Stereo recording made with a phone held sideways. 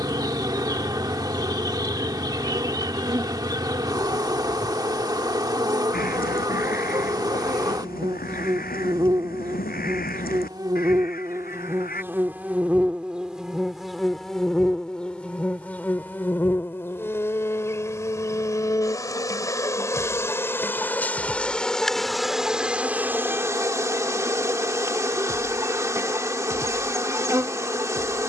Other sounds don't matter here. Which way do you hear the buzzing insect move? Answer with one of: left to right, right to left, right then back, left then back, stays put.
left then back.